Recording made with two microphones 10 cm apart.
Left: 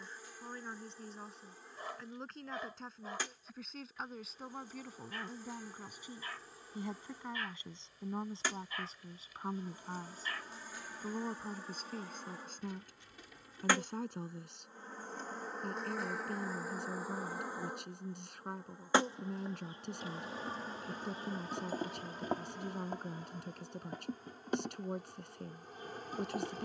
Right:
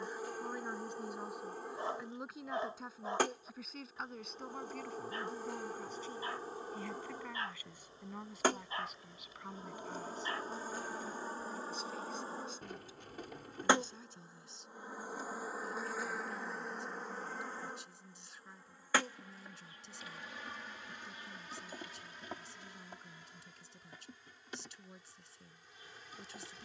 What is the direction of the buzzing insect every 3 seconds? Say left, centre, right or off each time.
right, right, right, right, right, centre, left, left, left.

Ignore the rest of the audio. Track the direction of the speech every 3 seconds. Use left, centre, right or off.
centre, centre, left, left, left, left, left, left, left.